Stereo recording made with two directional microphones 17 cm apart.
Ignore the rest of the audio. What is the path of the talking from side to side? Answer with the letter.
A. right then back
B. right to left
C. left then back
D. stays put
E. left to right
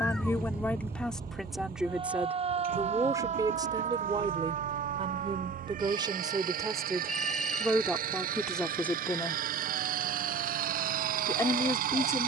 A.